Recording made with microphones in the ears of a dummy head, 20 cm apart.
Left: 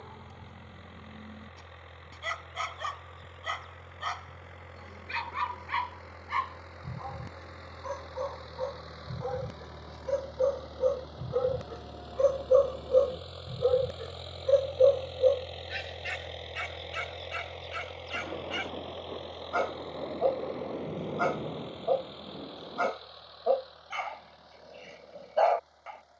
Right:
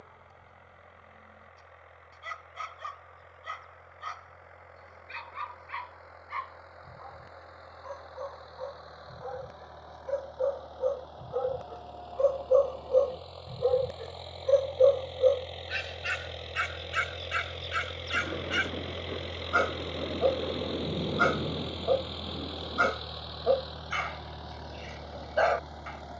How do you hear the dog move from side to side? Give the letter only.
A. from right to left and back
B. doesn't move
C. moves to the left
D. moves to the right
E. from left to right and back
D.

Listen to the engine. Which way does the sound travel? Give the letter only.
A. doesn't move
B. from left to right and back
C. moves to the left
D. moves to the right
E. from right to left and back
D.